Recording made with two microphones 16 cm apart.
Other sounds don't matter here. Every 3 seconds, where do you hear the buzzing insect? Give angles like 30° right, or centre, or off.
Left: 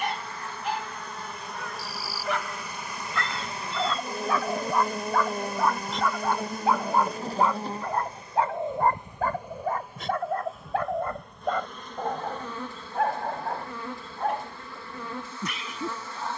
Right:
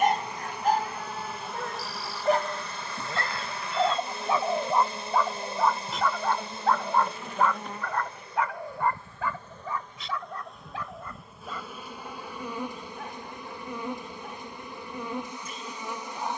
centre, 40° left, 30° left, centre, 20° right, 20° right.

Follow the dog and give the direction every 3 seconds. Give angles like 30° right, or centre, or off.
40° right, 20° right, 20° left, 50° left, 70° left, 80° left.